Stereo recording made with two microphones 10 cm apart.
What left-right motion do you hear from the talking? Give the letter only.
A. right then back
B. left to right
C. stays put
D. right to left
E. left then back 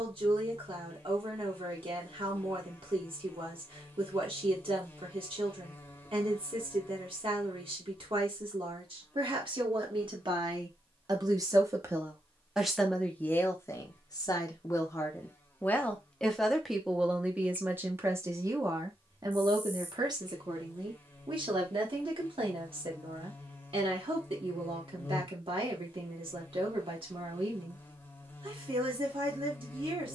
E.